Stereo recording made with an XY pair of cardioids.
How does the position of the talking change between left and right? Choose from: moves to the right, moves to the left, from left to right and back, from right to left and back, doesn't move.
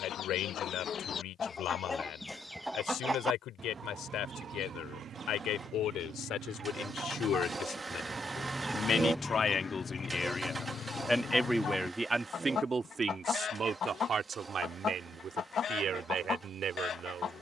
moves to the right.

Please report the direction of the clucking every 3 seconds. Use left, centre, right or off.
left, right, right, left, left, left.